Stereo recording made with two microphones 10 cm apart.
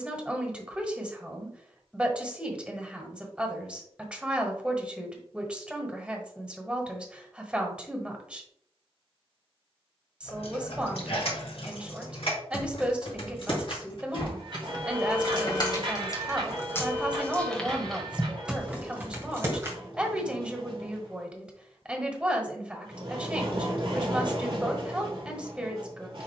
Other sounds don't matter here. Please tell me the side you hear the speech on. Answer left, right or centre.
centre.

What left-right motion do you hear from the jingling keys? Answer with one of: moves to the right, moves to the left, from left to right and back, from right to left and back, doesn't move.
moves to the right.